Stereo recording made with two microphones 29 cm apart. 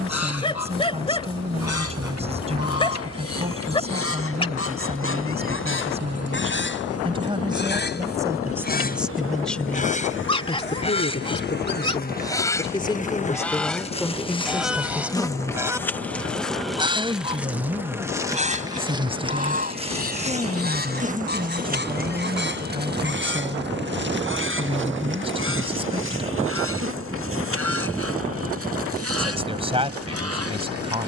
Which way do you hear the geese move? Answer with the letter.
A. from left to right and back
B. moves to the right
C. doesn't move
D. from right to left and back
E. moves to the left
B.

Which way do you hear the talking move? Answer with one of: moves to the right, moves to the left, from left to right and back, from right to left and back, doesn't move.
from right to left and back.